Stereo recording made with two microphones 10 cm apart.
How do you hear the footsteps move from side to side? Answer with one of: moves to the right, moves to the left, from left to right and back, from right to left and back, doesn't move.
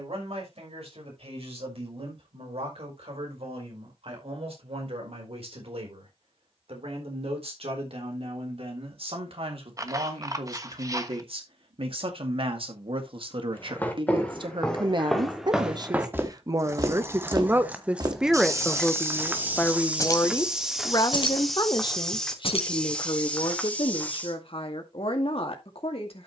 from left to right and back.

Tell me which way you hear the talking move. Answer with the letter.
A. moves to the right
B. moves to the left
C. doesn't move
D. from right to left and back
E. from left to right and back
B.